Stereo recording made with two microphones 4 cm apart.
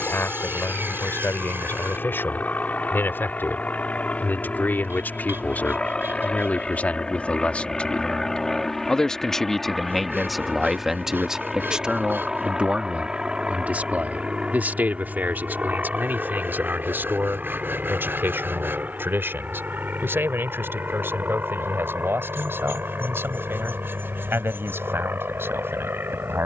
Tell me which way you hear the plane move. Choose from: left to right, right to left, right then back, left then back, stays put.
left to right.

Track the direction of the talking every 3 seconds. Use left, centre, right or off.
left, left, left, centre, right, right, right, right, right.